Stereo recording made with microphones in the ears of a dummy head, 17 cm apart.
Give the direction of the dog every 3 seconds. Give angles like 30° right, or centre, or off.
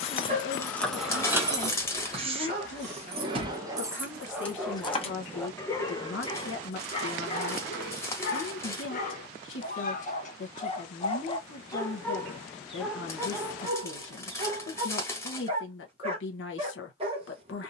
30° right, 10° right, 40° left, 40° left, 10° right, 30° right.